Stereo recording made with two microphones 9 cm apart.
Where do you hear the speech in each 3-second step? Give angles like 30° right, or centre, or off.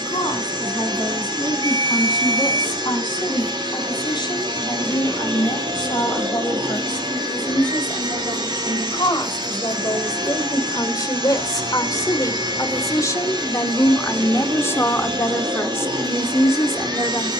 60° left, 60° left, 60° left, 50° left, 40° left, 30° left.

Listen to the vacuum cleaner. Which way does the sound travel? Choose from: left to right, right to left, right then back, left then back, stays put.
stays put.